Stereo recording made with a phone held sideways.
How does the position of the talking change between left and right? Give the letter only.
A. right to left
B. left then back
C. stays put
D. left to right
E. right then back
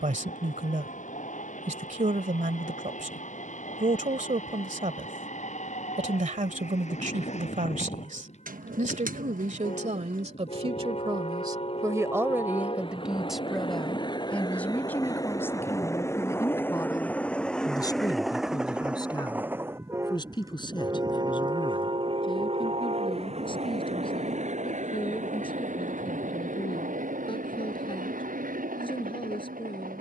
A.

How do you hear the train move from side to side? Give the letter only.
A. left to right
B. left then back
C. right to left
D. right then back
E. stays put
A.